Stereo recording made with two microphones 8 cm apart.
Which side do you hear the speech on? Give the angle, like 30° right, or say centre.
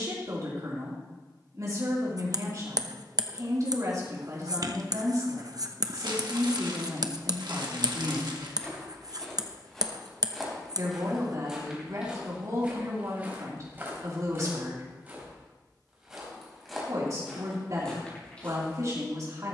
50° right.